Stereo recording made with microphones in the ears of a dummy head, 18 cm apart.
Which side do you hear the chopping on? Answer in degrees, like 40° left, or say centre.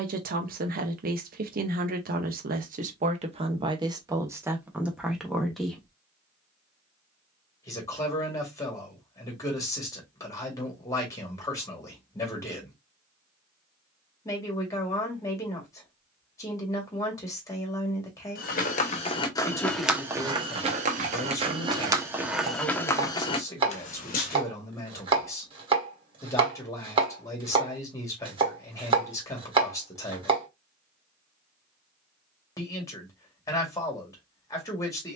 30° right.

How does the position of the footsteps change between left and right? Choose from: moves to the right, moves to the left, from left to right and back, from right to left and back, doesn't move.
from left to right and back.